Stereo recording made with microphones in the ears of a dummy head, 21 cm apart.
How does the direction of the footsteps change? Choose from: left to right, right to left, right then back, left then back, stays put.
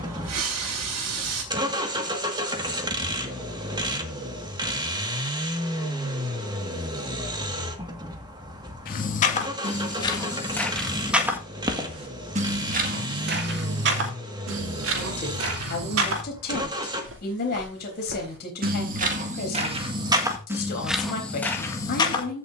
right then back.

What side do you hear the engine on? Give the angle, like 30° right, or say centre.
20° right.